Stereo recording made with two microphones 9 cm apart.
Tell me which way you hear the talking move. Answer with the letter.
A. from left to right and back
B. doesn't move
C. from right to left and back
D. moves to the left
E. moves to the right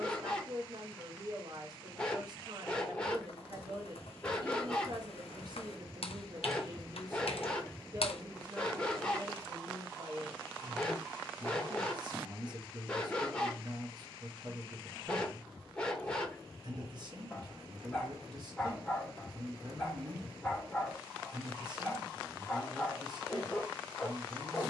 B.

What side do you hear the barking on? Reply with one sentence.
You can hear the barking in the centre.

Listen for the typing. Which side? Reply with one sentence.
In this clip you hear the typing on the left.